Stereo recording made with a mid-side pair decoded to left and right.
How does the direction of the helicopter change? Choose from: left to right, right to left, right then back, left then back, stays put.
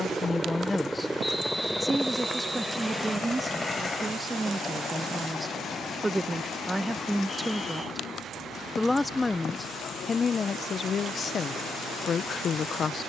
right to left.